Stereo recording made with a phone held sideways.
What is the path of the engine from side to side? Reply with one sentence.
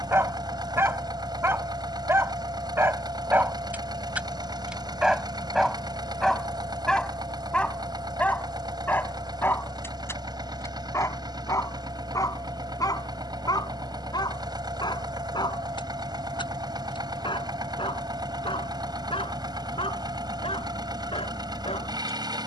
You can hear the engine stay in one place.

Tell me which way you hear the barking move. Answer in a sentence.
In this clip you hear the barking move to the left.